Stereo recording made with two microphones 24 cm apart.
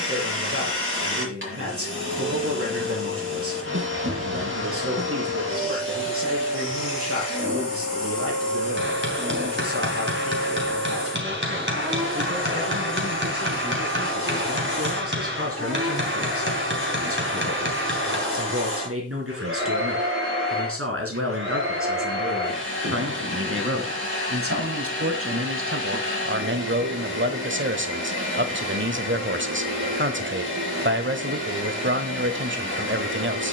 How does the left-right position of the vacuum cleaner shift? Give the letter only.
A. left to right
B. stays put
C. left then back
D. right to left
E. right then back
B.